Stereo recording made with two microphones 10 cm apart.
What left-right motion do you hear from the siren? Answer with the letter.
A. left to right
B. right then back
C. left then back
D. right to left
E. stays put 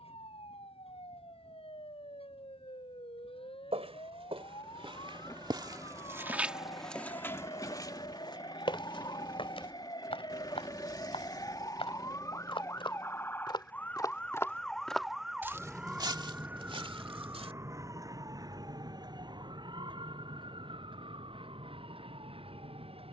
A.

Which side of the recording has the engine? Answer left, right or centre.
left.